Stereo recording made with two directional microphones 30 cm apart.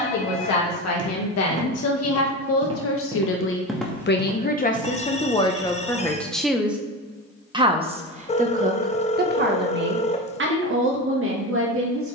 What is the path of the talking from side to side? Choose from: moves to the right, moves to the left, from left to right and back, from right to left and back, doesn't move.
moves to the right.